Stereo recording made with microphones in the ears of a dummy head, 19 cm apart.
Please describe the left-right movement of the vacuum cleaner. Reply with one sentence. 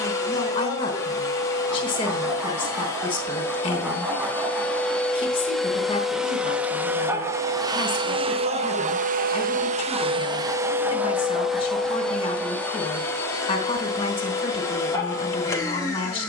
In this clip you hear the vacuum cleaner move from left to right and back again.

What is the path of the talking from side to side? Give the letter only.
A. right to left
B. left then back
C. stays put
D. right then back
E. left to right
C.